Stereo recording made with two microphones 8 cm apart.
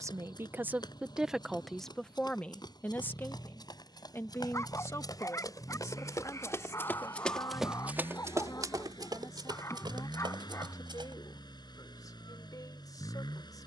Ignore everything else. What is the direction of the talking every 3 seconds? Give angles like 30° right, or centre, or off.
centre, 40° left, 50° left, 50° left, 60° left.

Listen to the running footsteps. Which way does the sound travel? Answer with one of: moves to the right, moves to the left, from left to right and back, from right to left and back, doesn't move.
moves to the right.